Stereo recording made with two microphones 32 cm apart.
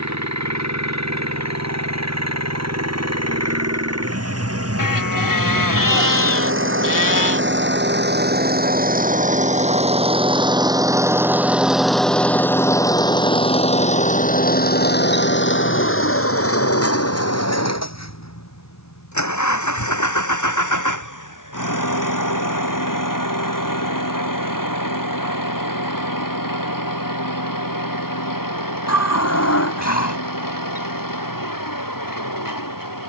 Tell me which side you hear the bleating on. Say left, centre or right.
left.